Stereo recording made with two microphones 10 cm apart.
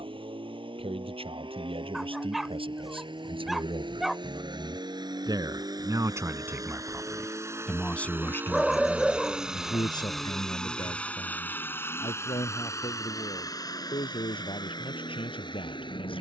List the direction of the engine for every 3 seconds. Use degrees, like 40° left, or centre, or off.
60° right, 50° right, 30° right, 10° left, 40° left, 50° left.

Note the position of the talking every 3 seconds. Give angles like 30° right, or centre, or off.
70° right, 50° right, centre, 50° left, 60° left, 60° left.